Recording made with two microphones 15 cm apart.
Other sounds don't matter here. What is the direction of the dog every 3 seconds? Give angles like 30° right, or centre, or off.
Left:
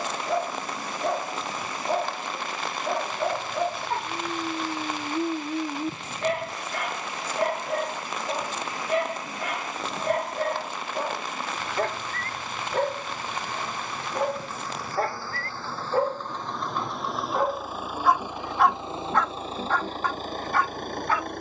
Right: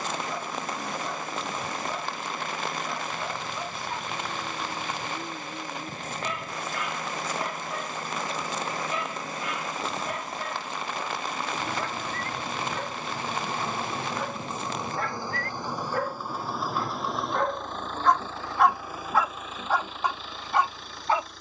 60° left, 60° left, 60° left, 60° left, 50° left, 30° left, 10° right.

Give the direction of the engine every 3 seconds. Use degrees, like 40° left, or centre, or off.
50° right, 50° right, 40° right, 40° right, 30° right, 10° right, 30° left.